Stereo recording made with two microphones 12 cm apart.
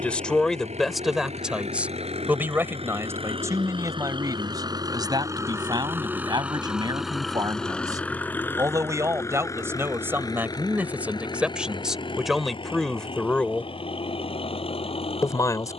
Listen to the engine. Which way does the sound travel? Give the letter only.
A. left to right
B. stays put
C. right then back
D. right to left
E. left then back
D.